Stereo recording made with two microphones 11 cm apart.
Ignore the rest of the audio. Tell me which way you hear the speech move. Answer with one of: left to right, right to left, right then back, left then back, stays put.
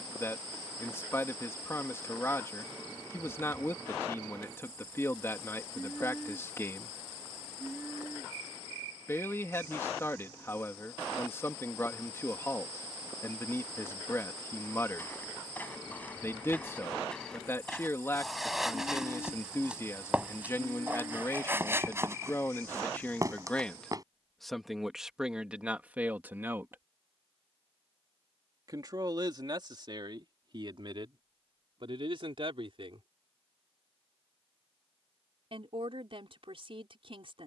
left to right.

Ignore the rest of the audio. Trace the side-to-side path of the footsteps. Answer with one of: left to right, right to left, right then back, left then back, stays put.
left to right.